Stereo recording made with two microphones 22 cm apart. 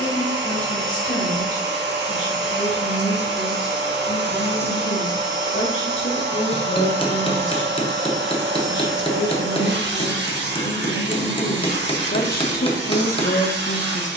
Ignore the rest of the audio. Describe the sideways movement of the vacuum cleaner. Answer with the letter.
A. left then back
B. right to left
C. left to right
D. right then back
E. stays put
E.